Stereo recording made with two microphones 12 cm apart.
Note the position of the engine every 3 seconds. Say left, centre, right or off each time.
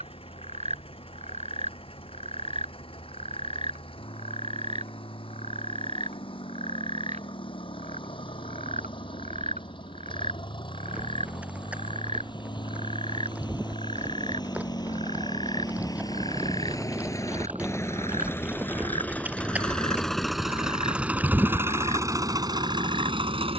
left, left, left, left, left, left, centre, right.